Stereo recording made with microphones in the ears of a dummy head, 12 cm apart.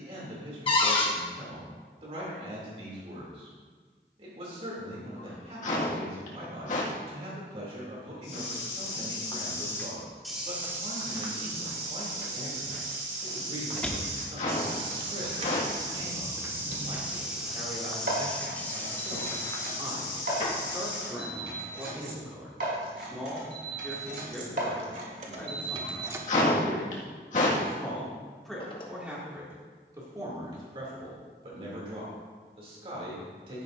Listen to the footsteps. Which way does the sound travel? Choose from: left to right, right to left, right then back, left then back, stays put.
right then back.